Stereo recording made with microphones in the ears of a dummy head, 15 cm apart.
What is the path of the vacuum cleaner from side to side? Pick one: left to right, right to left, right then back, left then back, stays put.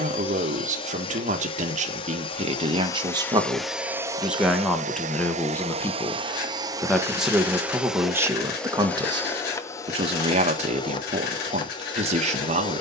right then back.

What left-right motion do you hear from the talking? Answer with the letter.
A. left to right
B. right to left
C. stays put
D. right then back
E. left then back
E.